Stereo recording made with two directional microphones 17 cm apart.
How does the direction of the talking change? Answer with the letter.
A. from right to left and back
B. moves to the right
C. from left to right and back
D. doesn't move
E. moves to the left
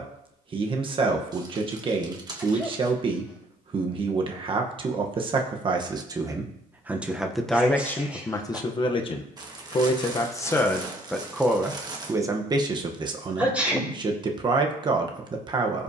A.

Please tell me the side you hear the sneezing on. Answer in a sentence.
You can hear the sneezing in the centre.